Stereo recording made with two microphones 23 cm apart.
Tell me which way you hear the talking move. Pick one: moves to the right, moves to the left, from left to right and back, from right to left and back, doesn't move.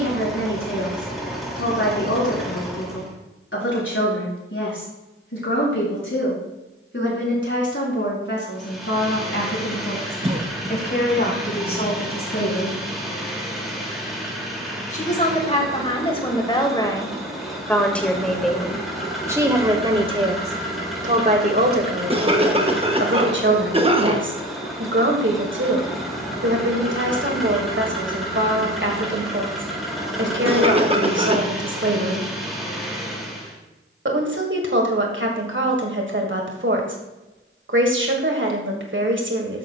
moves to the right.